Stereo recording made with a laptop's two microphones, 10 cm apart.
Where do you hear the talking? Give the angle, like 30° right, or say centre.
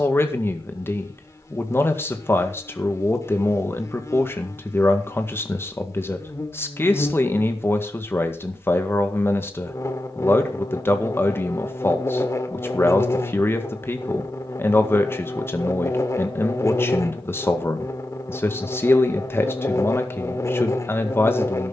20° left.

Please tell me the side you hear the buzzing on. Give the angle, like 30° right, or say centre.
30° left.